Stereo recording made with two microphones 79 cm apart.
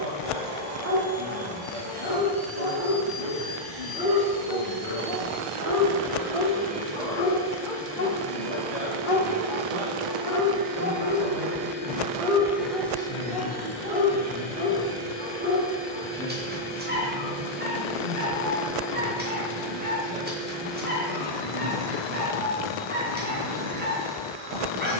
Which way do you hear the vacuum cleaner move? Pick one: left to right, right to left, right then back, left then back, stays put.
right to left.